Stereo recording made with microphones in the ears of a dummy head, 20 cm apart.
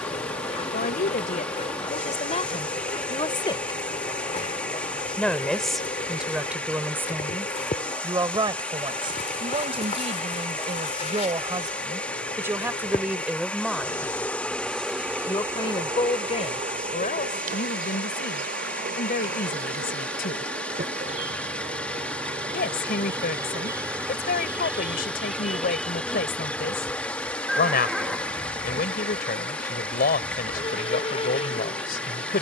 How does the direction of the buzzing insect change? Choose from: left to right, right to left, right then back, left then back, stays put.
right then back.